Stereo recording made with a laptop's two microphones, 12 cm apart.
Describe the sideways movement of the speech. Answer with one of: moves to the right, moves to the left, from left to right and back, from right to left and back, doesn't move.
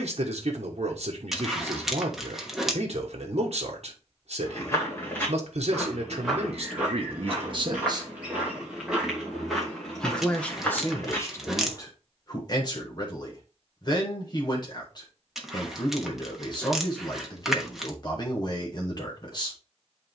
moves to the left.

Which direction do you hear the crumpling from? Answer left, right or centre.
centre.